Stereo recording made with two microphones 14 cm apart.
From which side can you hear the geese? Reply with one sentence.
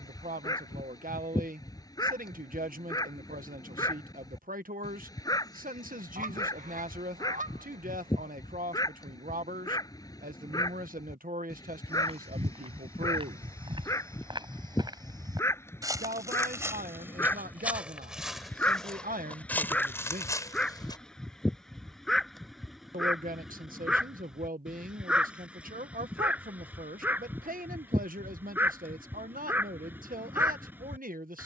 In this clip you hear the geese on the right.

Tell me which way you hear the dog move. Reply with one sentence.
In this clip you hear the dog travel towards the right.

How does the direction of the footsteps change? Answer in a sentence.
In this clip you hear the footsteps move to the left.